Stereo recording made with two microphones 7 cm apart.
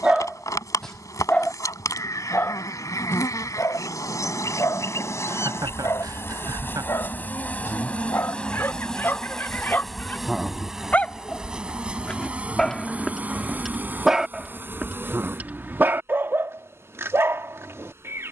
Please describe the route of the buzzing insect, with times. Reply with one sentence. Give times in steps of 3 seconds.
In this clip you hear the buzzing insect on the left from 0 s, in the centre from 9 s and on the right from 12 s.